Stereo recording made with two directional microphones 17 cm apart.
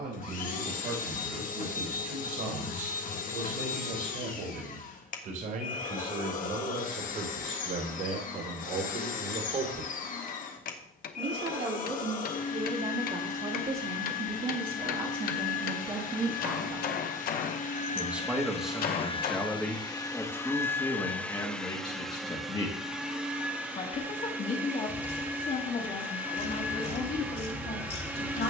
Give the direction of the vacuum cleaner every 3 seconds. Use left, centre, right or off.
left, left, left, left, left, left, left, centre, centre, centre.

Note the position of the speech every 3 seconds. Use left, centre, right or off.
right, right, right, right, right, right, centre, left, left, left.